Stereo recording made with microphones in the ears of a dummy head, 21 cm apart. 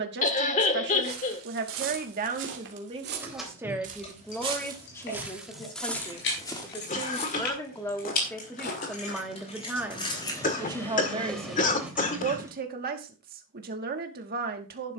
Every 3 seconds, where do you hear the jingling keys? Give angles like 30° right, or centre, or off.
off, 30° left, 40° left, 10° left, 10° right.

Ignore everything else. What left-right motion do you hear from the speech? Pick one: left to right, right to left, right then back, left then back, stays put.
left then back.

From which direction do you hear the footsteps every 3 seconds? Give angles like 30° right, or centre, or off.
60° right, 20° right, 30° left, 50° left, off.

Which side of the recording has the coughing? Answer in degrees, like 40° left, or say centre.
30° left.